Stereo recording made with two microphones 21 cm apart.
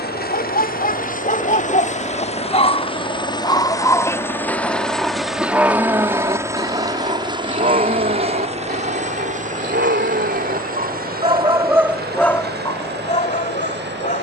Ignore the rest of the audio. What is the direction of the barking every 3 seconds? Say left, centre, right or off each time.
left, centre, right, right, left.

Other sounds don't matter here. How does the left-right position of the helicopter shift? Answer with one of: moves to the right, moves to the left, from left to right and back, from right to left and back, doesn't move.
moves to the right.